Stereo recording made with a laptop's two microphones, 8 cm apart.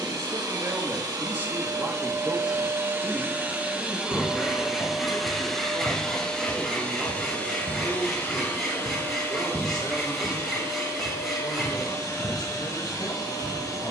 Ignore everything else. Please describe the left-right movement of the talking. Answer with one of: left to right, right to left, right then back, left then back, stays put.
right to left.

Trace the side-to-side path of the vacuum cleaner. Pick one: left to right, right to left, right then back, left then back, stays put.
right to left.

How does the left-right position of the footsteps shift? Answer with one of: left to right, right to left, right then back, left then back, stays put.
left then back.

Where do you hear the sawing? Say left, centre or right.
centre.